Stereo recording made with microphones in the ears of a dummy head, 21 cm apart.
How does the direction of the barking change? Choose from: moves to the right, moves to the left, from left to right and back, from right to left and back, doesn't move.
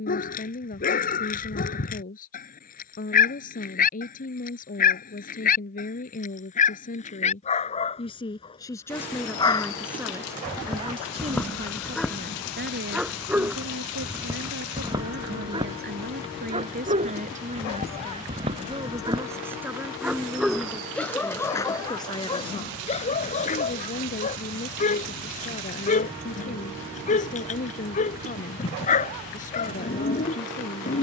from left to right and back.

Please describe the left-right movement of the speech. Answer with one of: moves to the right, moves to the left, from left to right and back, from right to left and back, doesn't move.
from left to right and back.